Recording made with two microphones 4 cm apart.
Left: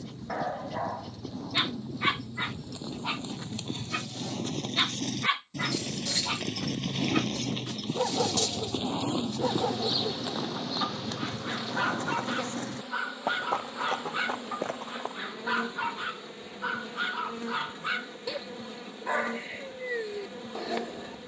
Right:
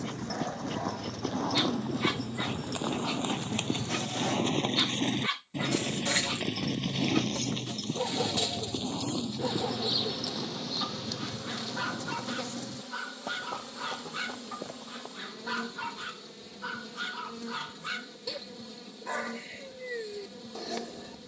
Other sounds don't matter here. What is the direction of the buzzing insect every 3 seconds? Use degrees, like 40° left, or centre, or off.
60° right, 60° right, 30° right, 10° left, 30° left, 40° left, 40° left.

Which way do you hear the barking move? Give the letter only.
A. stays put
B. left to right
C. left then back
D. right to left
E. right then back
A.